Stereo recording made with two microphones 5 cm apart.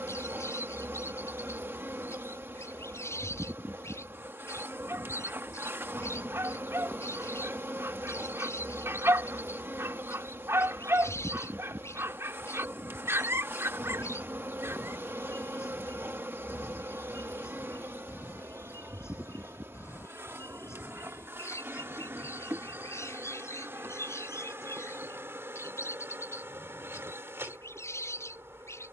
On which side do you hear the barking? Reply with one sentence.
You can hear the barking on the right.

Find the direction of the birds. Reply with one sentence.
In this clip you hear the birds on the left.